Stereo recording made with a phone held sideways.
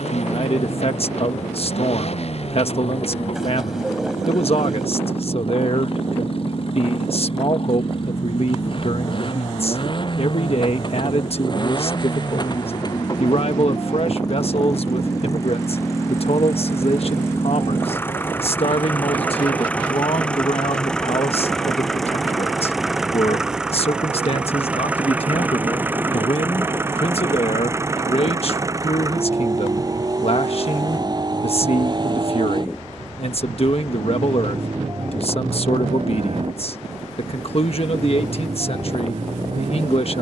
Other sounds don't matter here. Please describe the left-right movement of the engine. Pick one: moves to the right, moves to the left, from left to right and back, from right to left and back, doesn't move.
moves to the right.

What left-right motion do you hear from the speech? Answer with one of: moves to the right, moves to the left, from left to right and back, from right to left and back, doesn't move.
doesn't move.